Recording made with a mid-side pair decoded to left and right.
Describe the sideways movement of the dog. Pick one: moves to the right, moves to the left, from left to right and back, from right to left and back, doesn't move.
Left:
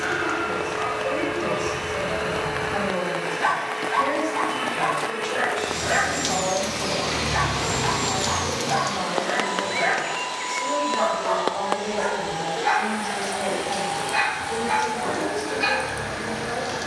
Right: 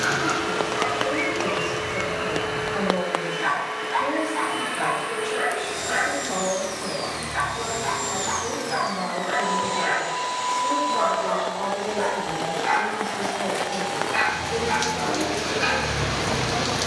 from right to left and back.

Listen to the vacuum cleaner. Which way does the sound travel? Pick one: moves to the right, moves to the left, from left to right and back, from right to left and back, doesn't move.
from left to right and back.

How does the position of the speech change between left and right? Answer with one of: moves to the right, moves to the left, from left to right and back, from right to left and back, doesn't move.
doesn't move.